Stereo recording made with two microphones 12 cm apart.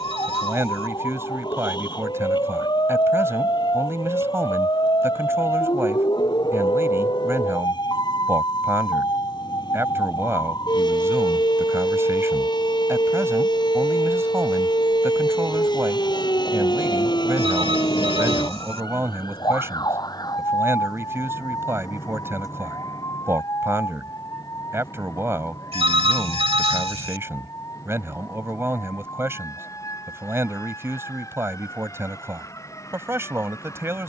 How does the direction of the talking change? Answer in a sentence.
In this clip you hear the talking stay put.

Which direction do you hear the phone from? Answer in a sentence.
You can hear the phone on the right.